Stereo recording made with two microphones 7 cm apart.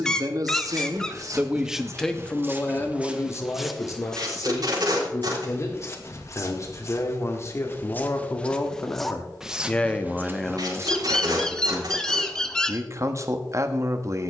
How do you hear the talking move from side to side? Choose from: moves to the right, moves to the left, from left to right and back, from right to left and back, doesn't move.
from right to left and back.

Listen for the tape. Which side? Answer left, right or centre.
right.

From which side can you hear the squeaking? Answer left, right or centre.
centre.